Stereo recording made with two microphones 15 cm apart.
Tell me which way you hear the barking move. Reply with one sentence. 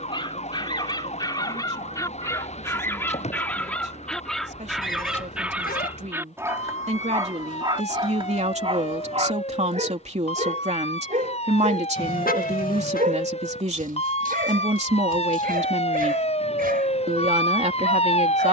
In this clip you hear the barking move from left to right.